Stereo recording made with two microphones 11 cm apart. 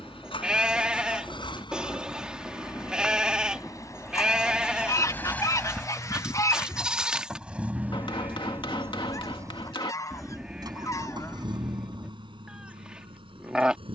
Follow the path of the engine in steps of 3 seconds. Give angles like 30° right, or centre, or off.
50° left, 20° left, 10° right, 40° right, 50° right.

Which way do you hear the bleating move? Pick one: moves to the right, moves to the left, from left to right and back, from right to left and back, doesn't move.
doesn't move.